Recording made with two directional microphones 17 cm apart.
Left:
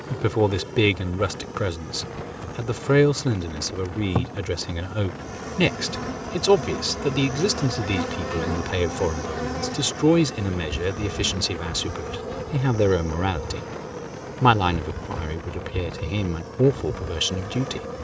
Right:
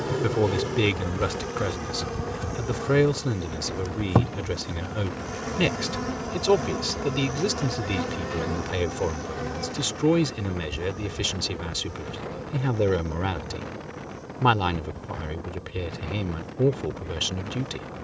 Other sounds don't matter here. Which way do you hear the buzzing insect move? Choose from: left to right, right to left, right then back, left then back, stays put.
right to left.